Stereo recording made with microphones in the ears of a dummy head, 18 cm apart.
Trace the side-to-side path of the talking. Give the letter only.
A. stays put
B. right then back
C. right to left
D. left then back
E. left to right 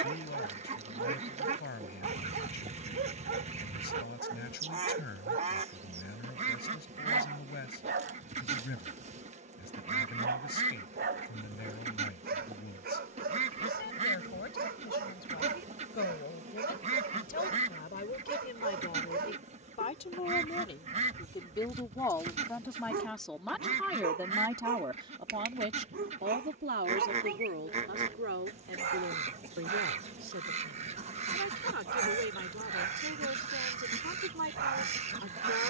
E.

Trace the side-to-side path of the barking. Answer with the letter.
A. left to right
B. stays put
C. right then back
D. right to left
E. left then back
B.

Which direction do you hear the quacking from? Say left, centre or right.
right.